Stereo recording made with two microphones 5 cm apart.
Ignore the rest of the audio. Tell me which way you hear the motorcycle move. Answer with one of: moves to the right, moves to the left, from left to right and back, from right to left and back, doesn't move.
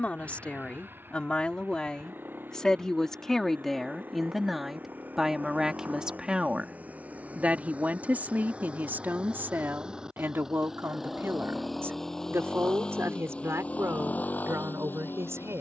moves to the left.